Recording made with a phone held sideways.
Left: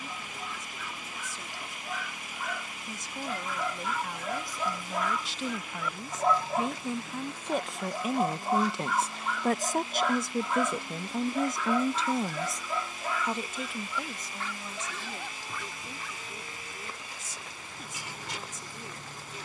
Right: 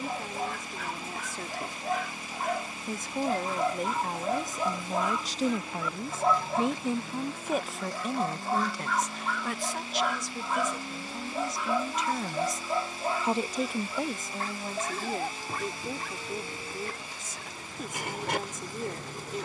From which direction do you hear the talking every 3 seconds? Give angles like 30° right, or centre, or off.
60° right, 40° right, centre, 50° left, 30° right, 60° right, 60° right.